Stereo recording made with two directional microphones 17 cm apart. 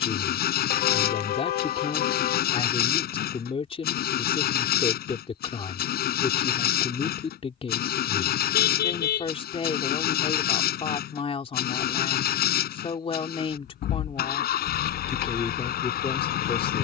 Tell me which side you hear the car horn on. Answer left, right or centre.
left.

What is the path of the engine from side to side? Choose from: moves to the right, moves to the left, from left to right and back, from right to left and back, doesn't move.
doesn't move.